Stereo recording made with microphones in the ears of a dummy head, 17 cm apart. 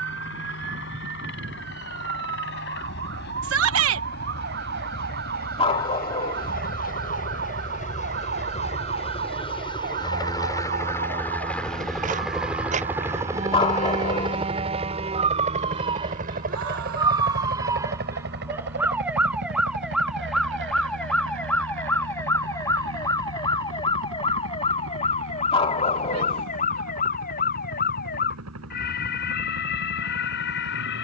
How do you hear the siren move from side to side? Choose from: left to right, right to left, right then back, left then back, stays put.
right to left.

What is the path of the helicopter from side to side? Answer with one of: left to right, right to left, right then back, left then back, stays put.
left to right.